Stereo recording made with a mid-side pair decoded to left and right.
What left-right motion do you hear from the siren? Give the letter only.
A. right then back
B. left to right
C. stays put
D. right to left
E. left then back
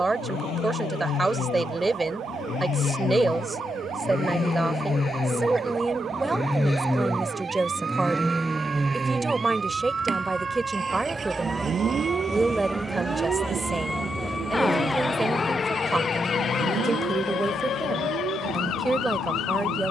D.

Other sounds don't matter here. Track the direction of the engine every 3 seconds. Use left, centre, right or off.
left, left, centre, right, right, right, right.